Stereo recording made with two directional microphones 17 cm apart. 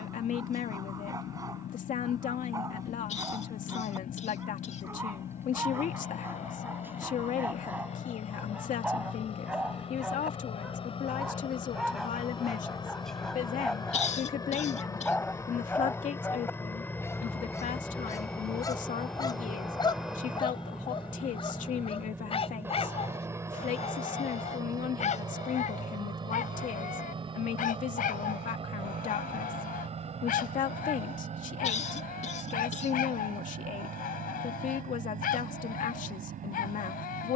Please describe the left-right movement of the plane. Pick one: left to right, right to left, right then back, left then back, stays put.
left to right.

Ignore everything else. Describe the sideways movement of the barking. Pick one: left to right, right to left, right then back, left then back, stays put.
right to left.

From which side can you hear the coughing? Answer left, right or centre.
left.